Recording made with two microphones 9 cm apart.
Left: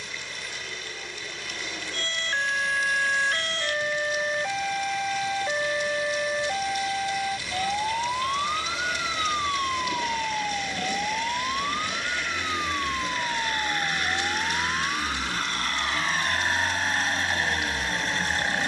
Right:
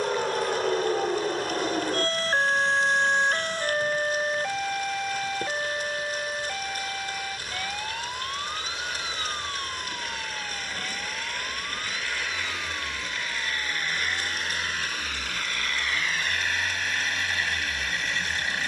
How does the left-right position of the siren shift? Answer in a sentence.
In this clip you hear the siren go from the right side to the left.